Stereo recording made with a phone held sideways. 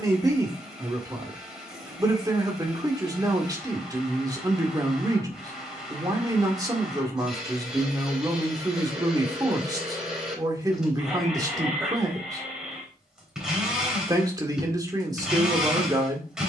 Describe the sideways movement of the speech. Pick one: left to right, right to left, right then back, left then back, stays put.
stays put.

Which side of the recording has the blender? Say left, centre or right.
centre.